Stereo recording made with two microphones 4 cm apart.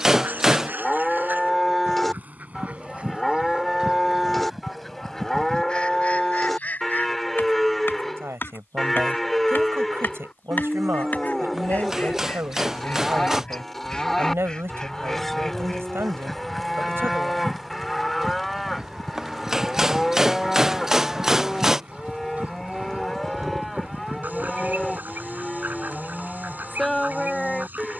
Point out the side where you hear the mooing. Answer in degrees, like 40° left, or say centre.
centre.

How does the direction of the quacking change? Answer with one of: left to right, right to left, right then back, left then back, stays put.
left then back.